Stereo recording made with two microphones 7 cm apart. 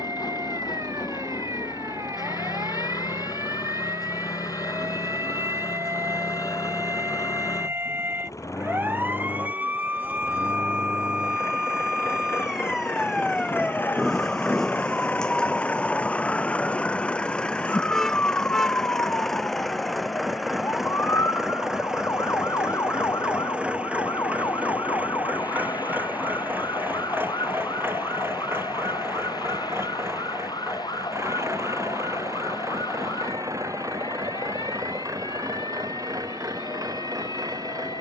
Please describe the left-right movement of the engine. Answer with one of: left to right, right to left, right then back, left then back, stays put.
left to right.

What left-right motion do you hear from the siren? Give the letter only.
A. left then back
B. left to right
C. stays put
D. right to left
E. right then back
D.